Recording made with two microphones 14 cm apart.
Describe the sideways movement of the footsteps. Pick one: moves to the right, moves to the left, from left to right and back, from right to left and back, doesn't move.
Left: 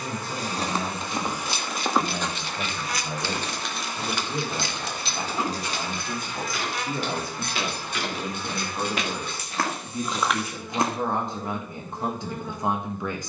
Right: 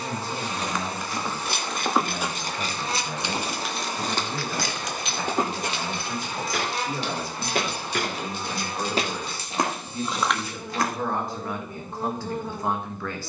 from left to right and back.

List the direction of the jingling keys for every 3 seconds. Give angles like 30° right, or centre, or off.
50° right, 20° left, 60° left, 60° left, off.